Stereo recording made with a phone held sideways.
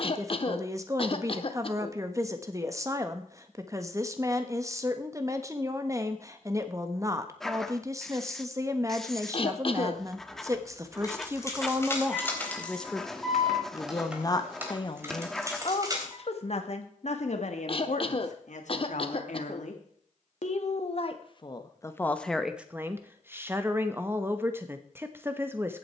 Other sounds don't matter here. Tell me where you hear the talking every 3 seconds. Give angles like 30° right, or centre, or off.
20° right, 20° right, 20° right, 20° right, 20° left, 50° left, 60° left, centre, 20° right.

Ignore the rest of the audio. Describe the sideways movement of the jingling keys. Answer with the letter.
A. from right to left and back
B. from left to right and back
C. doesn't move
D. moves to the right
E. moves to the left
D.